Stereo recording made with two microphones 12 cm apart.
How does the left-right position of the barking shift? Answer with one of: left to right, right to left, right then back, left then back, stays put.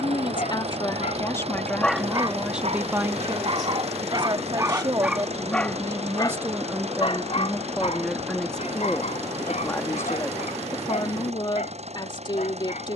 right then back.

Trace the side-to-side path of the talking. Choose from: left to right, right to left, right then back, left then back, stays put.
right then back.